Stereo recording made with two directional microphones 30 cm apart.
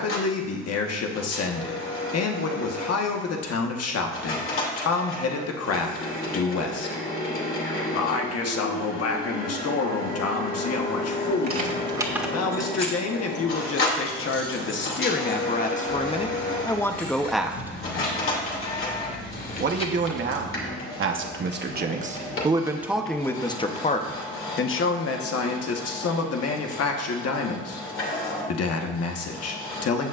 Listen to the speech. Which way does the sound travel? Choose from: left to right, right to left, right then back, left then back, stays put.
right then back.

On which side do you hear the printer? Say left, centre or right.
left.